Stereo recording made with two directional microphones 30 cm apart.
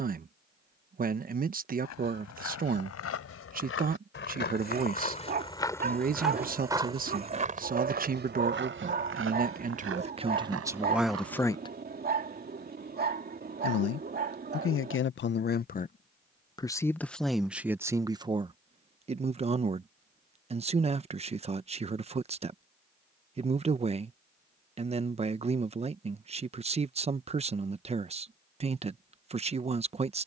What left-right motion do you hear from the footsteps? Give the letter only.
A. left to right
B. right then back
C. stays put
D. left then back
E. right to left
A.